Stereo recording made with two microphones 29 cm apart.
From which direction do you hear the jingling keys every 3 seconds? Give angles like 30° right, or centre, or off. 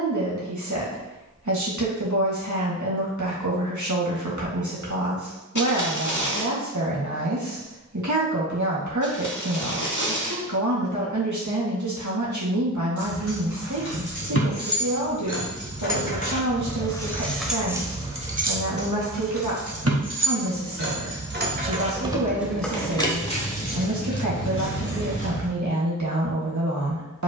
off, off, off, off, 50° left, 20° left, 40° right, centre, 40° left.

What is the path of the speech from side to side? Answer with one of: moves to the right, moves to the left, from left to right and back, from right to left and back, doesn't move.
doesn't move.